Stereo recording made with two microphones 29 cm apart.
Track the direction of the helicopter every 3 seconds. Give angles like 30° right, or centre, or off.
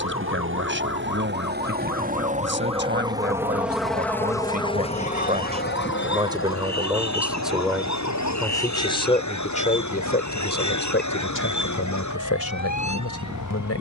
40° right, 10° left, 50° left, 70° left, 80° left.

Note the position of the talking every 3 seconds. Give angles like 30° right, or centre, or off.
40° right, 30° right, centre, 40° left, 60° left.